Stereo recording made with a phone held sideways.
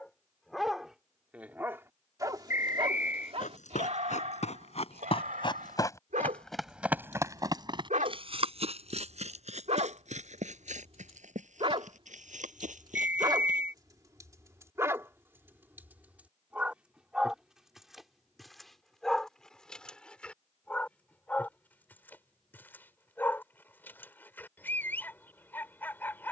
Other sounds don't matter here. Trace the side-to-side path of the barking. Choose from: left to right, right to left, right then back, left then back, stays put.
right then back.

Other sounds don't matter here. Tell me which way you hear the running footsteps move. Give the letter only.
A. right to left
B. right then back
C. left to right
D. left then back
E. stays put
C.